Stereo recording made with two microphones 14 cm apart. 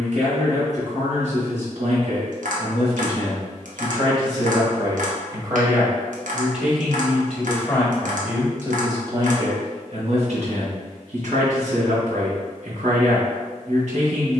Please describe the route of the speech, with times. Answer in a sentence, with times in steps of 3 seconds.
You can hear the speech on the right from 0 s, in the centre from 6 s and on the right from 9 s.